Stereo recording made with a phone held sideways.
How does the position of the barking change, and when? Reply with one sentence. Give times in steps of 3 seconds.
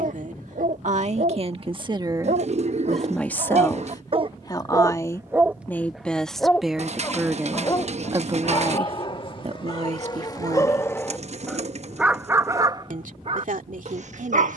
In this clip you hear the barking on the right from 0 s, on the left from 6 s and on the right from 12 s.